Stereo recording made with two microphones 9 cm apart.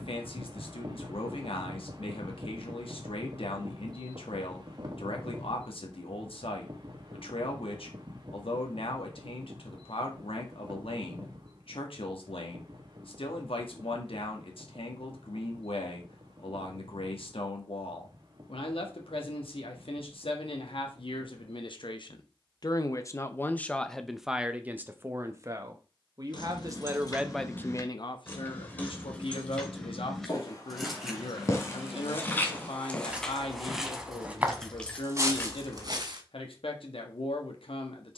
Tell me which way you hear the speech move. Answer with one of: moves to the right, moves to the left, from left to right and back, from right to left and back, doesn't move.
from left to right and back.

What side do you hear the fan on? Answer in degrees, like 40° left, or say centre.
50° right.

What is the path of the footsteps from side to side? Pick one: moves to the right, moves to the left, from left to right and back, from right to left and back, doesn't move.
moves to the right.